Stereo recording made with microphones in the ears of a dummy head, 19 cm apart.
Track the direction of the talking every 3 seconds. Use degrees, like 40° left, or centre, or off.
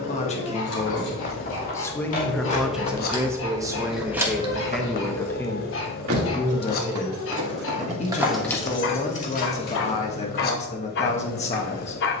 20° left, centre, 30° left, 30° left.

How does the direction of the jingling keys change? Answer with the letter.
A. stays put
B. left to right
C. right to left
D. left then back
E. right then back
E.